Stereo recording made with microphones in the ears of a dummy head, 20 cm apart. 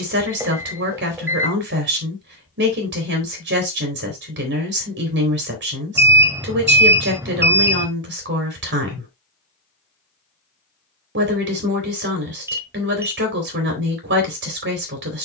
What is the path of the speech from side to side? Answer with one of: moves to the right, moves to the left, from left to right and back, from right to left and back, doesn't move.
doesn't move.